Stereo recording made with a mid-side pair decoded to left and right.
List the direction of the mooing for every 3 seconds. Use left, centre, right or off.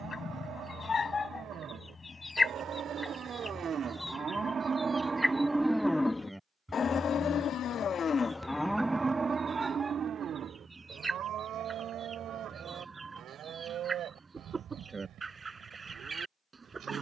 right, right, left, right, right, right.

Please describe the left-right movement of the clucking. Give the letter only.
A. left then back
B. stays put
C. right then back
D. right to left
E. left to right
E.